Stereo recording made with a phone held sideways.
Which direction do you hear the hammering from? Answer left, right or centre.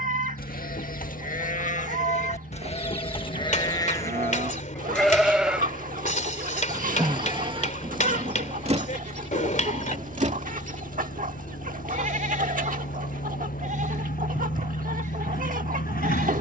left.